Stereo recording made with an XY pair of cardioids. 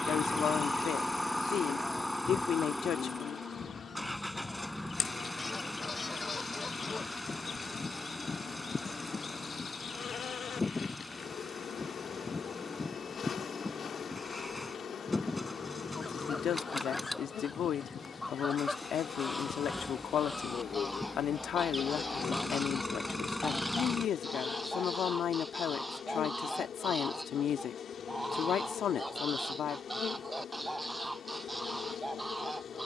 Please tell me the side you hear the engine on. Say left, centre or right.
centre.